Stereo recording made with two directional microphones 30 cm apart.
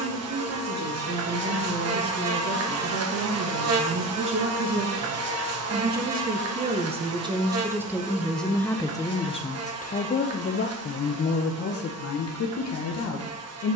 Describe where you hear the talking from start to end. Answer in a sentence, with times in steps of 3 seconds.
You can hear the talking on the right from 0 s, in the centre from 6 s and on the left from 9 s.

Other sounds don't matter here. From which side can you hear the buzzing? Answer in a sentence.
In this clip you hear the buzzing on the right.